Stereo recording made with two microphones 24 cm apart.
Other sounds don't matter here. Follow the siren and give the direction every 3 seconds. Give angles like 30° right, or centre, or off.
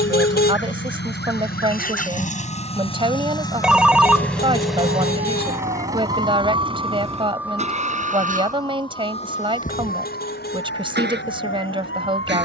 60° right, 40° right, 10° right, 40° left.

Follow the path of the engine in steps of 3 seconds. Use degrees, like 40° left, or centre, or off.
40° left, centre, 30° right, 50° right.